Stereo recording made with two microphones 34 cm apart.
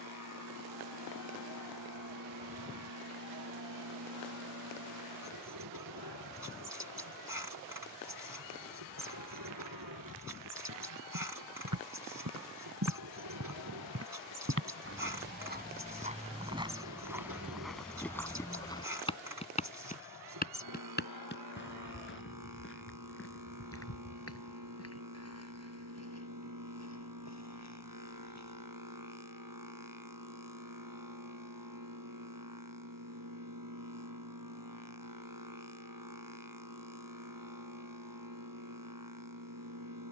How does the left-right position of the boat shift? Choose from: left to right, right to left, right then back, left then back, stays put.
stays put.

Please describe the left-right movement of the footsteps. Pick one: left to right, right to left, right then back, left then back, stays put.
right to left.